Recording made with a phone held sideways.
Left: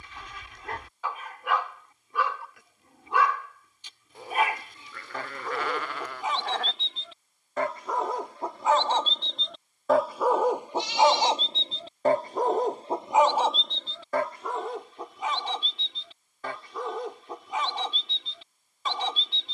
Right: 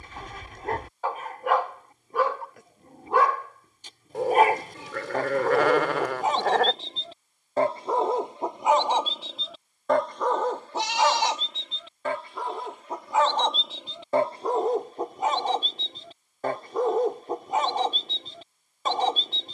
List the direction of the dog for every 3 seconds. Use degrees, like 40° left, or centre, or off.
40° right, 40° right, 30° right, 10° left, centre, 40° right, 40° right.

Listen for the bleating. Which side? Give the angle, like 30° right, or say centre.
80° right.